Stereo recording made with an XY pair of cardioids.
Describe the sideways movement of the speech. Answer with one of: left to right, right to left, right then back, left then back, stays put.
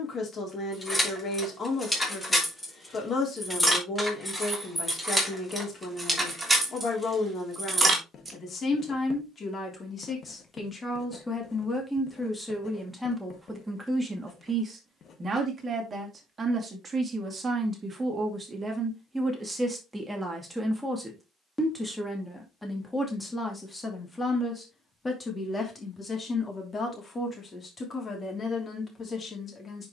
right then back.